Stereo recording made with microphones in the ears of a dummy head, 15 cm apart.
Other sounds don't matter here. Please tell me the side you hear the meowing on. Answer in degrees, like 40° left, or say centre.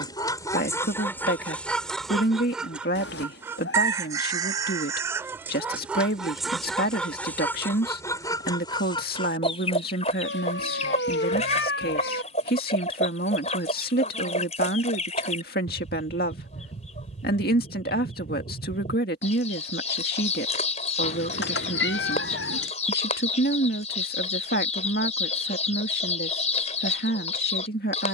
70° left.